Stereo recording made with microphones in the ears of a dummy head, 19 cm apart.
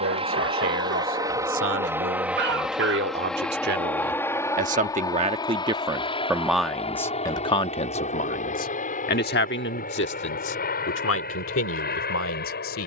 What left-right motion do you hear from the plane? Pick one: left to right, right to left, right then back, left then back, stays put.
right to left.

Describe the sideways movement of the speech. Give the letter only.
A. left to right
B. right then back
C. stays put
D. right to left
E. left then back
D.